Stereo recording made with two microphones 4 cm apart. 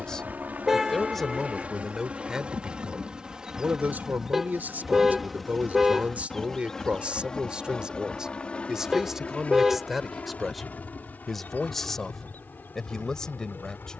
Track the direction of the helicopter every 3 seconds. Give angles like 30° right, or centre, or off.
30° right, 10° right, 20° left, 40° left, 50° left.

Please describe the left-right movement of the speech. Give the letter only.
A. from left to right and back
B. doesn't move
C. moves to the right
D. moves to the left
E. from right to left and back
A.